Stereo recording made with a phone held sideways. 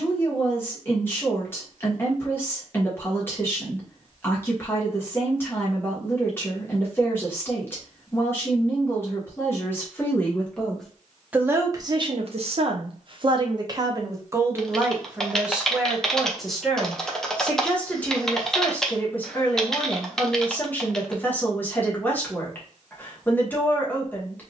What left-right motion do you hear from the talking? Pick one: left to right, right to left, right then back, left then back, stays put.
right then back.